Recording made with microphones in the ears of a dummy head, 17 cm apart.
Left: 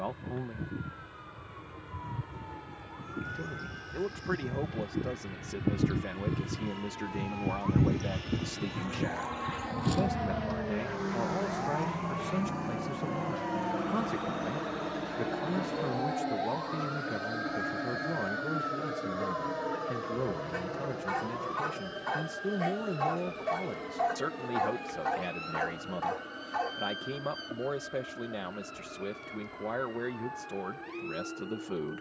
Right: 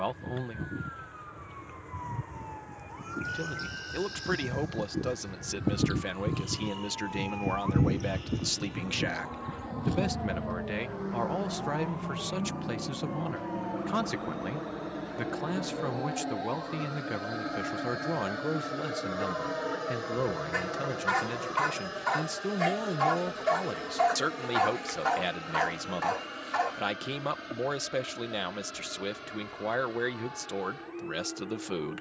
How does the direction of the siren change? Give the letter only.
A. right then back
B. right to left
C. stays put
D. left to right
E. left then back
B.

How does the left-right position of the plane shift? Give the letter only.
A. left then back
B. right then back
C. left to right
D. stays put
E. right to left
C.